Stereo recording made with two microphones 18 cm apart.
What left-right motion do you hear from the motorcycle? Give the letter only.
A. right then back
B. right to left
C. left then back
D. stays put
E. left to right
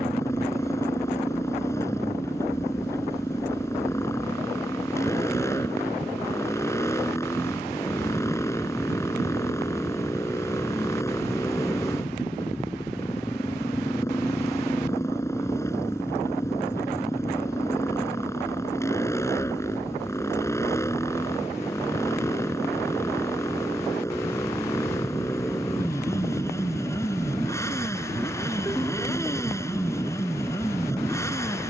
D.